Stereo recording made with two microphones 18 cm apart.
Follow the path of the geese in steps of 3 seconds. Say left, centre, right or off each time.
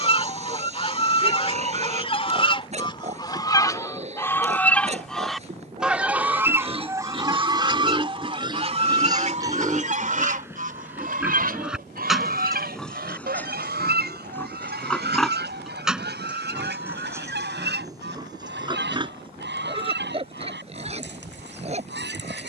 left, centre, right, right, right, right, right, right.